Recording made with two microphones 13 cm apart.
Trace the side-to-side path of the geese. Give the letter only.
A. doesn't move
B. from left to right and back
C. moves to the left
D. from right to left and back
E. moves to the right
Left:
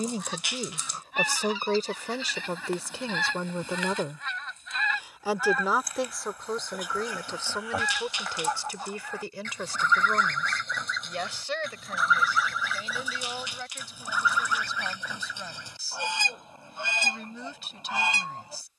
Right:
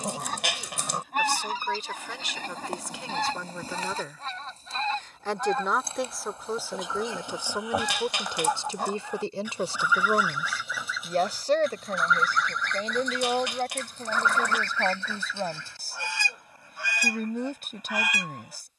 C.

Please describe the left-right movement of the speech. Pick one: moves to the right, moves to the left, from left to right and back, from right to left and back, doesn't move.
moves to the right.